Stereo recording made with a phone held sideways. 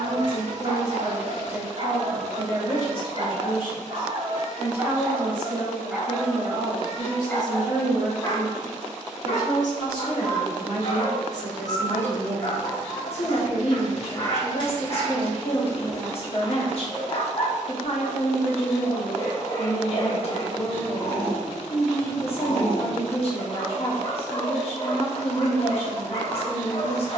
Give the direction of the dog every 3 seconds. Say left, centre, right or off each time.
right, right, centre, left, left, left, left, left, left.